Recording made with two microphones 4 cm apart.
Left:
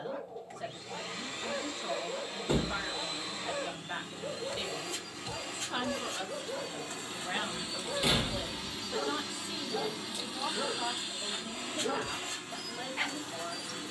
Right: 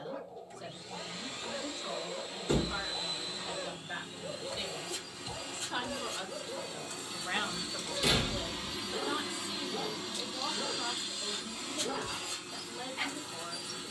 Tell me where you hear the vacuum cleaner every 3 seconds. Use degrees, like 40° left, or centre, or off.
50° left, 50° left, 30° left, 10° left, 50° left.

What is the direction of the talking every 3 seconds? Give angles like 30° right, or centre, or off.
40° left, 30° left, centre, 40° left, 40° left.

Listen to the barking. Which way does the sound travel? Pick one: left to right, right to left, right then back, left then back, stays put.
stays put.